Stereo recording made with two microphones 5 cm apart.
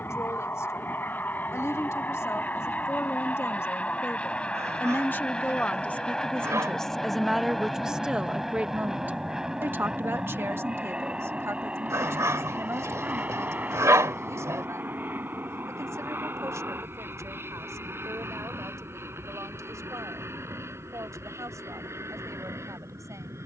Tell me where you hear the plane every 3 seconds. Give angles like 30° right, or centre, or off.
40° left, 20° left, centre, 20° right, 30° right, 40° right, 50° right, 50° right.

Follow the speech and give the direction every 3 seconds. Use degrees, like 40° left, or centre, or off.
60° left, 40° left, 10° right, 50° right, 70° right, 80° right, 80° right, 80° right.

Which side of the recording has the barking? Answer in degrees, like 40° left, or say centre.
70° right.